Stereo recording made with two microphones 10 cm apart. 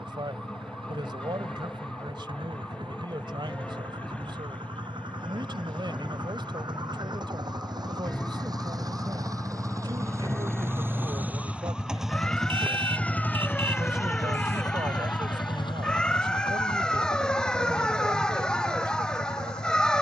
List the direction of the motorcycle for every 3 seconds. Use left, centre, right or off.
right, right, right, right, left, left, left.